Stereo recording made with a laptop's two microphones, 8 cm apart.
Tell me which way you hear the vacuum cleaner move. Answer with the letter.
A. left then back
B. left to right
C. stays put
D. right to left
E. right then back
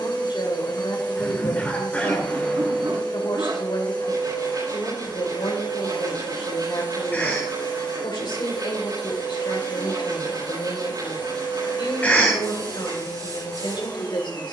C.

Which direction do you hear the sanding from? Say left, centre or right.
right.